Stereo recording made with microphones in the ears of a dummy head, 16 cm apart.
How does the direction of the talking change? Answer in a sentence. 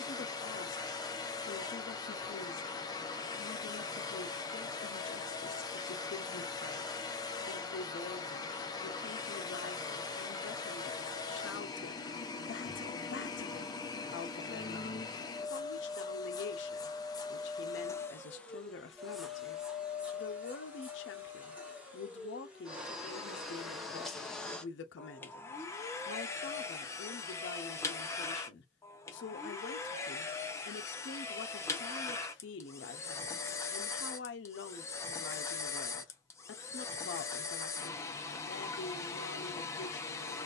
You can hear the talking stay in one place.